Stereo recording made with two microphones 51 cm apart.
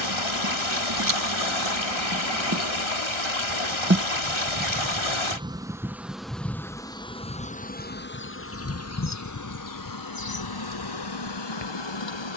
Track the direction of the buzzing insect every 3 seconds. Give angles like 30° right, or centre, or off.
40° right, 20° right, 10° left, 50° left.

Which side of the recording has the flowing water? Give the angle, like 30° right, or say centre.
70° left.